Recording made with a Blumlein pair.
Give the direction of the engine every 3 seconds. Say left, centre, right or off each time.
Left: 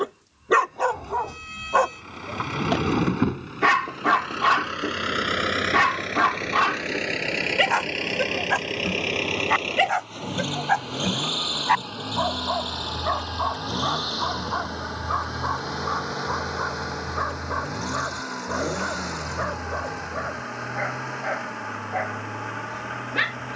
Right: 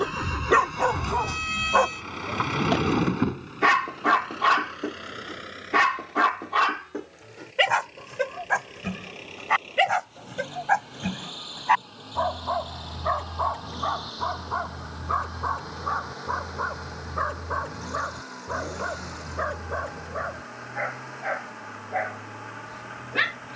right, left, left, left, left, left, left, left.